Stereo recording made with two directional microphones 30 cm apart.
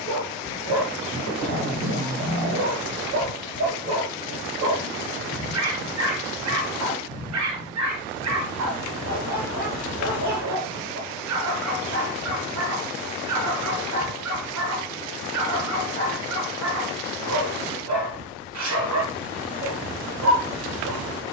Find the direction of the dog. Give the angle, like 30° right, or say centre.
60° right.